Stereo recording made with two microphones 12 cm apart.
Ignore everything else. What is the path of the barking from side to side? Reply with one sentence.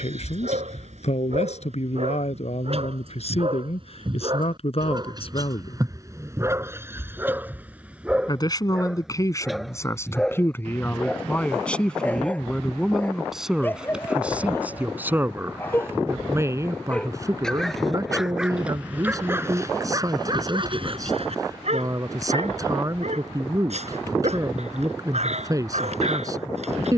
In this clip you hear the barking go left and come back.